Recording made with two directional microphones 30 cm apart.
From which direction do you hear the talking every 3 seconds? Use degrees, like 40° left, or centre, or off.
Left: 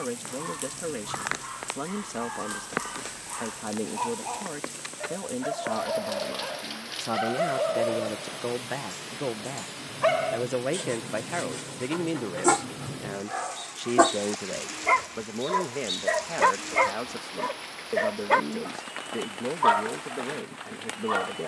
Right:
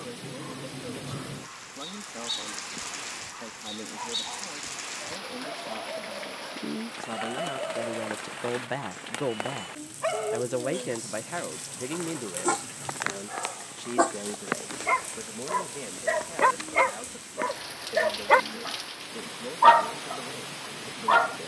60° left, 60° left, 30° left, 10° left, 40° left, 50° left, 60° left.